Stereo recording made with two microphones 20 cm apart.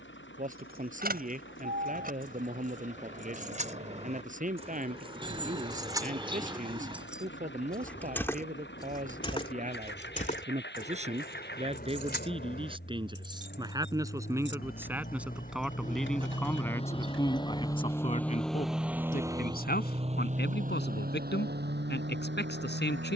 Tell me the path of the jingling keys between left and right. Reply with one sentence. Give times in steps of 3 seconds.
You can hear the jingling keys on the right from 0 s, in the centre from 6 s, on the left from 9 s and not at all from 18 s.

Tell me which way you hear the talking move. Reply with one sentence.
In this clip you hear the talking move from right to left.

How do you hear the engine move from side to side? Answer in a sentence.
In this clip you hear the engine go from the left side to the right.